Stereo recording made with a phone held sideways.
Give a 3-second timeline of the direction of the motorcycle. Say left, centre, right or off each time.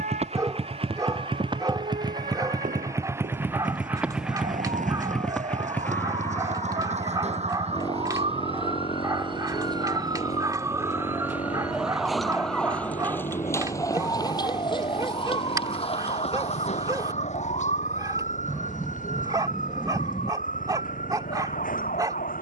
right, centre, left, left, left, left, left, left.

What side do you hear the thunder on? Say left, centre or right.
centre.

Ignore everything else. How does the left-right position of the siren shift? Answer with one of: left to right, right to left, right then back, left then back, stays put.
right to left.